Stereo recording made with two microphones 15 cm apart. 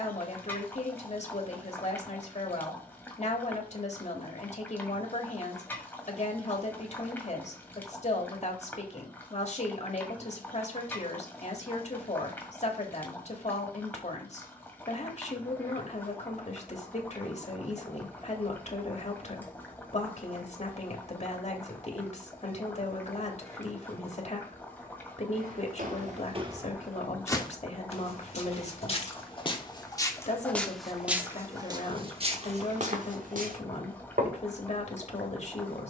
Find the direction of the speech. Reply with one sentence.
In this clip you hear the speech on the left.